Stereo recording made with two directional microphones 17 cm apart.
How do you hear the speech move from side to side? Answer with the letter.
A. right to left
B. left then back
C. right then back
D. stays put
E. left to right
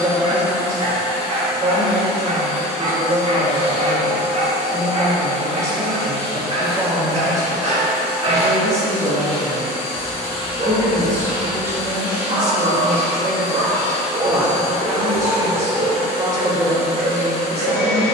D.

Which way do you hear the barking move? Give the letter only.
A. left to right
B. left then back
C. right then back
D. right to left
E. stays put
E.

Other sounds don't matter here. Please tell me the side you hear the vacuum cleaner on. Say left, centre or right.
left.